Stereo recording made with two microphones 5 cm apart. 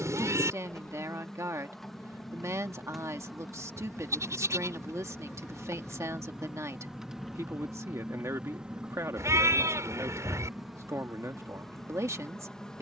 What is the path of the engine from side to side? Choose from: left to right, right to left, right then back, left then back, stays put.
left to right.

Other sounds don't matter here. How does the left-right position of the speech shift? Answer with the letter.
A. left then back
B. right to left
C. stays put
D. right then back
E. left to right
C.